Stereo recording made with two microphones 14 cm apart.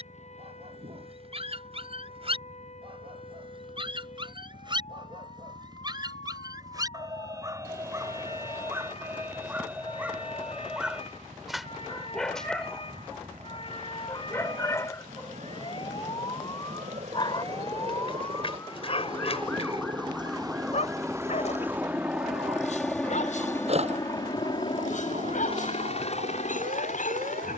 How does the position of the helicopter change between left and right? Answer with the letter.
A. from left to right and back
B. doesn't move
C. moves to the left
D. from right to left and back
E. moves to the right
C.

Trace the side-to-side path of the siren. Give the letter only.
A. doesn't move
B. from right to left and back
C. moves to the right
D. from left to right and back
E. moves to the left
C.